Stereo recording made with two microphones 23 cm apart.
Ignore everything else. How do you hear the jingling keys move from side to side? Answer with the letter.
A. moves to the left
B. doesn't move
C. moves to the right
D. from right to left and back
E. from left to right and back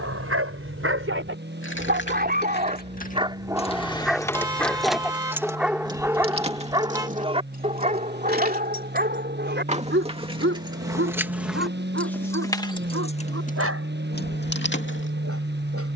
E.